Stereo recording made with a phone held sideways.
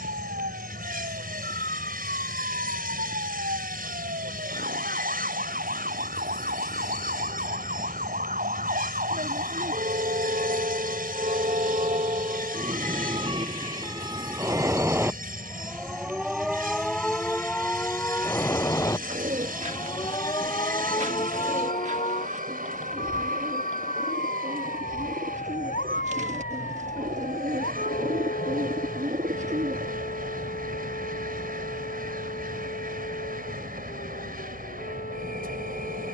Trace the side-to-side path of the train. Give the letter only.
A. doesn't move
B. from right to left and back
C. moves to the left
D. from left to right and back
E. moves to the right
A.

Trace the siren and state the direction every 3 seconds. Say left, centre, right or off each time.
right, right, right, right, right, centre, left, left, left, left, left, left.